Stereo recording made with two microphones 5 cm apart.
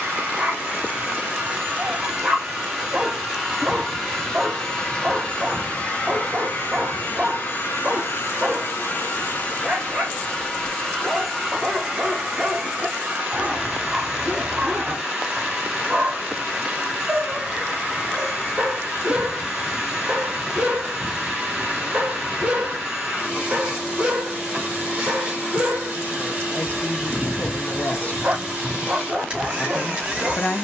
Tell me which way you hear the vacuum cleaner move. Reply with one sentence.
You can hear the vacuum cleaner move from right to left and back again.